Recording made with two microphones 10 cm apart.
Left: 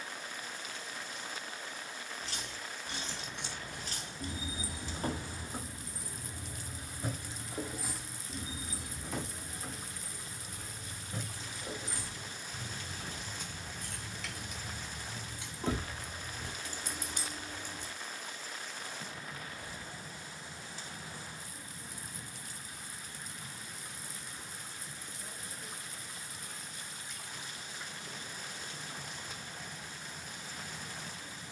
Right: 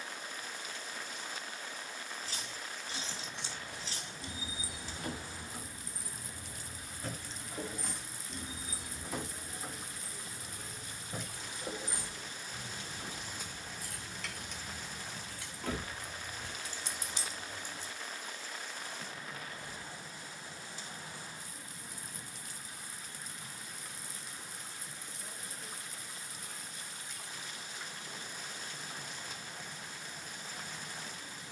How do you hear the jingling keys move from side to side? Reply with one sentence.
In this clip you hear the jingling keys move from left to right and back again.